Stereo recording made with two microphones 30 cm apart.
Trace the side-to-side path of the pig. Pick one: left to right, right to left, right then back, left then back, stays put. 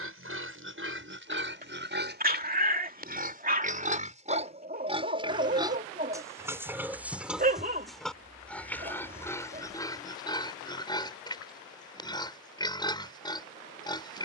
right to left.